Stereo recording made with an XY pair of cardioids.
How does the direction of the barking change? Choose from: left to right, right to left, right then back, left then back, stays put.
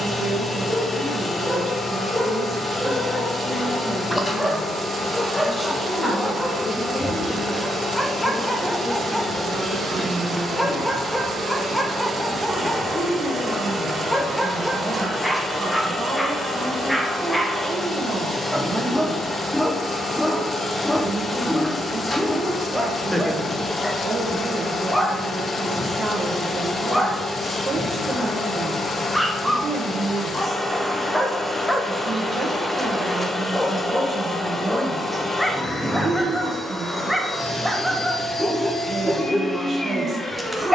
stays put.